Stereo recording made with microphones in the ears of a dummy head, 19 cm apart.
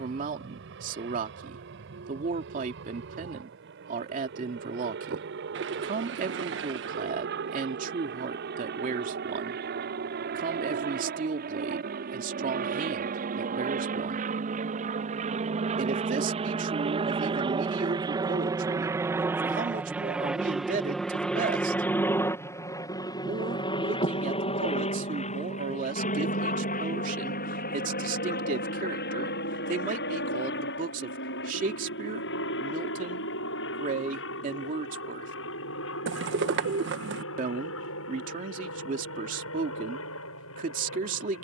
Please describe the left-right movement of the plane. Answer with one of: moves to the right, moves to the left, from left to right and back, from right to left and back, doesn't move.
moves to the left.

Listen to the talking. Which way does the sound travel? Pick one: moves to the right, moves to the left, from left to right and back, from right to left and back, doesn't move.
doesn't move.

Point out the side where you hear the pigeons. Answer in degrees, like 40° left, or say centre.
60° right.